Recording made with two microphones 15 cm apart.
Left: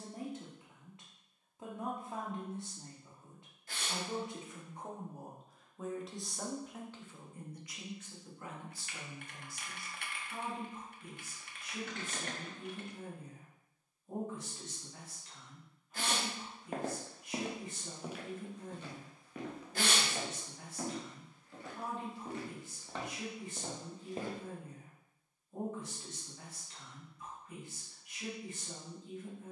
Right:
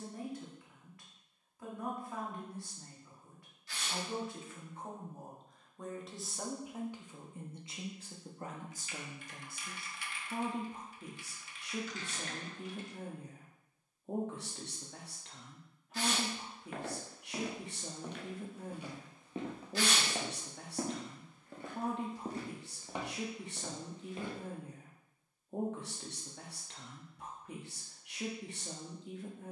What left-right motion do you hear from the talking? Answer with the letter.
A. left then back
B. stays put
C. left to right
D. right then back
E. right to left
C.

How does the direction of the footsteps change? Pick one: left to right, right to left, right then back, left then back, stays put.
right then back.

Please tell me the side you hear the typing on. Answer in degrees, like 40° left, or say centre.
60° left.